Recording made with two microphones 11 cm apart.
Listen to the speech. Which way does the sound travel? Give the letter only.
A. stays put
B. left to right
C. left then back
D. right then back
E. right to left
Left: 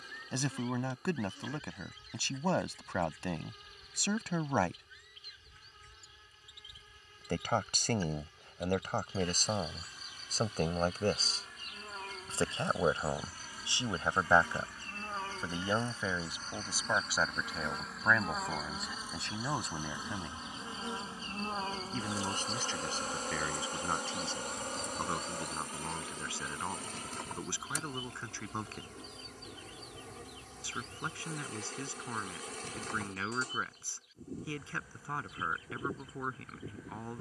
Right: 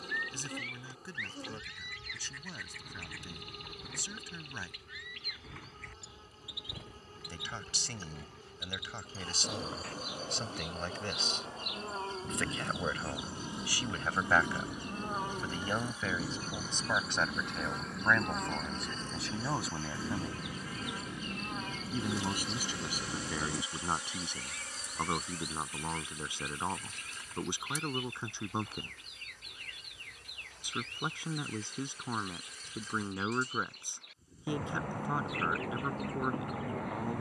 B.